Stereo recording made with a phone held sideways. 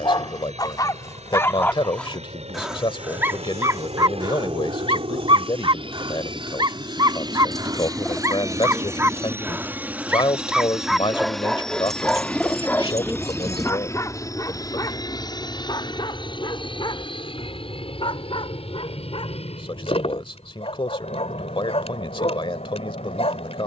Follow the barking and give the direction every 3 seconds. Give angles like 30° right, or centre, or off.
20° left, 30° right, 30° right, centre, 20° left, 40° left, 50° left, 50° left.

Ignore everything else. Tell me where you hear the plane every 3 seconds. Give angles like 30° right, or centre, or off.
60° right, 50° right, 30° right, 10° right, 20° left, 40° left, 50° left, 50° left.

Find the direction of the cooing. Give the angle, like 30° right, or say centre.
centre.